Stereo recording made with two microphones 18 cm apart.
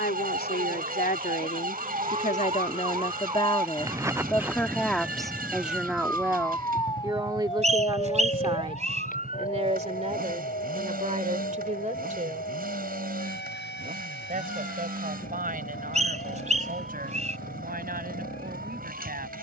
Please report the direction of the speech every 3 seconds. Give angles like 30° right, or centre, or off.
50° left, 10° left, 20° right, 40° right, 50° right, 50° right, 60° right.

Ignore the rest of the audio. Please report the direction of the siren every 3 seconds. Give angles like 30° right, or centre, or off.
40° right, 10° right, 30° left, 50° left, 70° left, 70° left, 80° left.